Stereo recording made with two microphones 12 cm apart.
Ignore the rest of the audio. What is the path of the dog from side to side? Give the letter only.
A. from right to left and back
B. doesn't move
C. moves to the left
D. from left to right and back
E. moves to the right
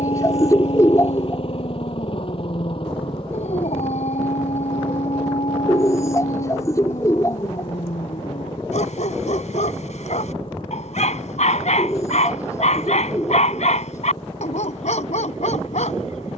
B.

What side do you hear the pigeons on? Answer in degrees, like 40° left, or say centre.
30° left.